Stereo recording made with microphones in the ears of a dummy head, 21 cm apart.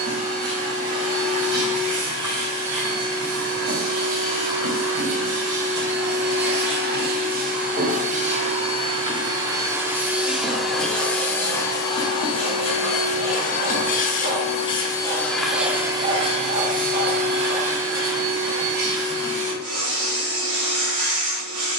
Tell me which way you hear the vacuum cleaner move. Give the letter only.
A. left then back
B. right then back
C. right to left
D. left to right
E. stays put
A.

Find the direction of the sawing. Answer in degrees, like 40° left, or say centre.
40° right.